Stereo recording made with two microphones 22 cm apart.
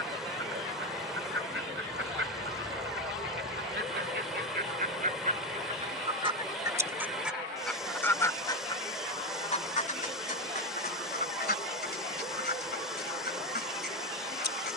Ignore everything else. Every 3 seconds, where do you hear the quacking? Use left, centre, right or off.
right, right, centre, left, left.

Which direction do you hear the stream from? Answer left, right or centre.
centre.